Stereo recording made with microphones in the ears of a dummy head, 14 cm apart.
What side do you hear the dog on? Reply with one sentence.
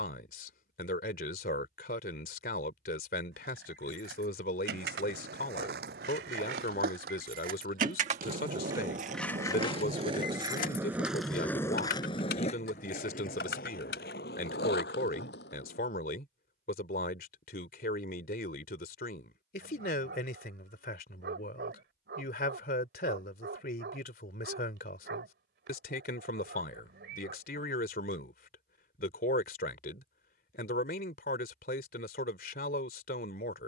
In this clip you hear the dog on the right.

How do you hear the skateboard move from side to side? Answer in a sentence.
You can hear the skateboard move to the left.